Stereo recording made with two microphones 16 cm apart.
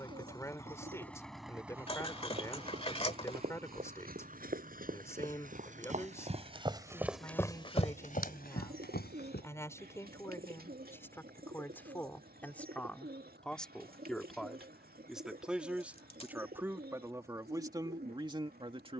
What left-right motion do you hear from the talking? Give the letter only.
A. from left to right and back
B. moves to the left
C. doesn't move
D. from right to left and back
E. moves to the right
E.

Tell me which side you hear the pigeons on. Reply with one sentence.
In this clip you hear the pigeons on the right.